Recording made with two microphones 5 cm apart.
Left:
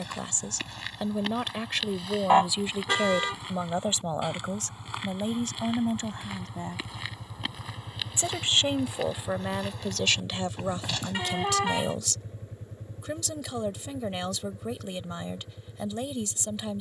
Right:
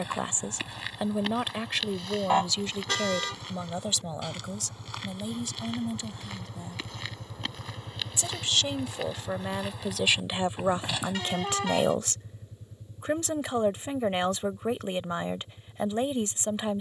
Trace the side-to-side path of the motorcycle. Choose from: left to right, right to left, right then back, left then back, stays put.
right to left.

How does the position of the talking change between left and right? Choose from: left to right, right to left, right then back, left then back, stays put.
left then back.